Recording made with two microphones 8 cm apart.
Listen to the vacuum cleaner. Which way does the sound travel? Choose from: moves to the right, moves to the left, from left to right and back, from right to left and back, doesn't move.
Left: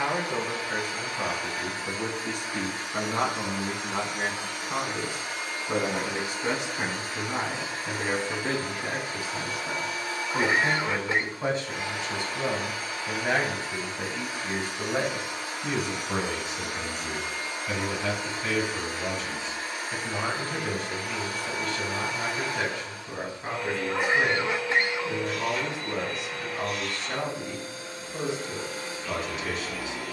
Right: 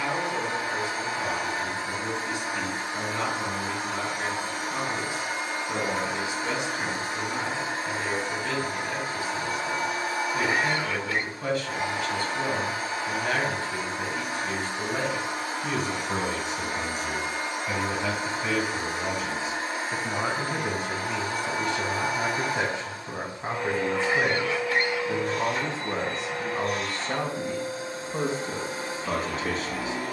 doesn't move.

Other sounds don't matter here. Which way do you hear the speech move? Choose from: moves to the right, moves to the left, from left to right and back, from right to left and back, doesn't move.
moves to the right.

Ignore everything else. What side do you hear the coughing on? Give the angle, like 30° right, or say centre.
20° left.